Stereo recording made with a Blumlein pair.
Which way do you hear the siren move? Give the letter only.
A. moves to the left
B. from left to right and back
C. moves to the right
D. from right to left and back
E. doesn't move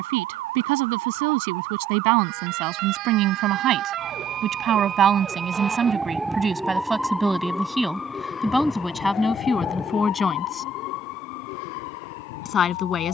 A.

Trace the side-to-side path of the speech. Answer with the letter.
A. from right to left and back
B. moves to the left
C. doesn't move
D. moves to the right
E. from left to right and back
B.